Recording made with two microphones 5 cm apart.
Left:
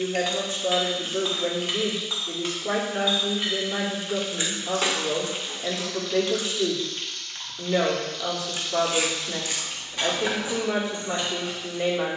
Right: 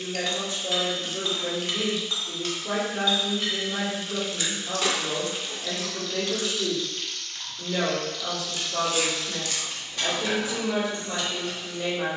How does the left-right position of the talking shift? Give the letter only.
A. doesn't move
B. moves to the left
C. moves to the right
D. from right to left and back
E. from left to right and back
A.